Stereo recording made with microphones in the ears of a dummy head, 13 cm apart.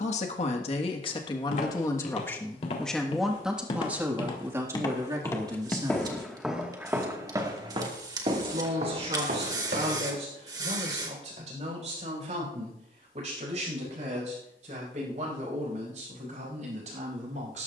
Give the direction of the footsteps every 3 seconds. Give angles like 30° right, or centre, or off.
50° left, 30° left, 30° right, 60° right, off, off.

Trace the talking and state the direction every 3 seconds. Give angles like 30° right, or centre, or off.
30° left, 20° right, 40° right, 50° right, 50° right, 50° right.